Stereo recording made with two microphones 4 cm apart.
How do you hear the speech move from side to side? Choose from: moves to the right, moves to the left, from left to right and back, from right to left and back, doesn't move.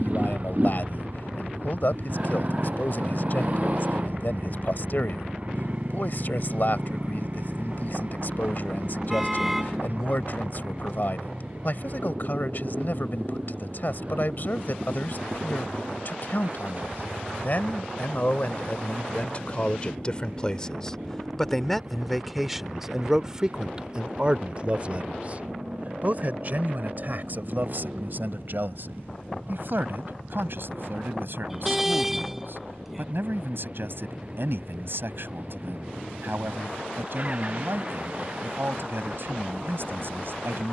moves to the right.